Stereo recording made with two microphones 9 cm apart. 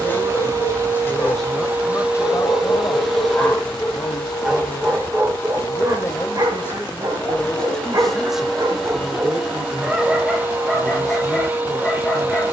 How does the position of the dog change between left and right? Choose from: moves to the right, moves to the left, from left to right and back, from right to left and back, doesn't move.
from left to right and back.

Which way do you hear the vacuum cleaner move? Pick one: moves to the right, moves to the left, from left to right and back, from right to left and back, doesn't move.
from right to left and back.